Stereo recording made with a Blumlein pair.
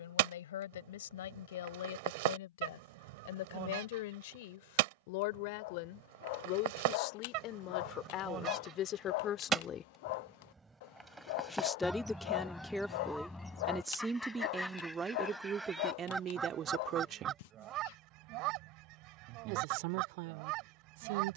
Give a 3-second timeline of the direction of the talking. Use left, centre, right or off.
left, left, left, left, centre, right, right.